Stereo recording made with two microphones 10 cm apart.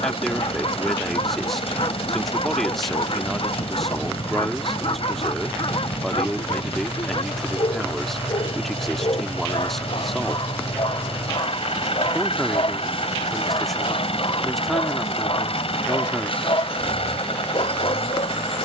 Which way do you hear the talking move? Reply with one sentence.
In this clip you hear the talking stay in one place.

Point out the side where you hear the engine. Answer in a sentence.
You can hear the engine on the left.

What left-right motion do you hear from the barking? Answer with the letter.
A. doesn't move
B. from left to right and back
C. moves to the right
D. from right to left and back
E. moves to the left
A.